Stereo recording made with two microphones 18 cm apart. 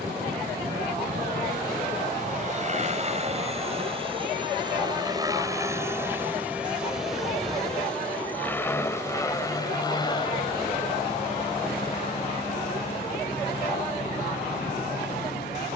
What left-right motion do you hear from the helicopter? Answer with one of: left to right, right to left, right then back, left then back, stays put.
right to left.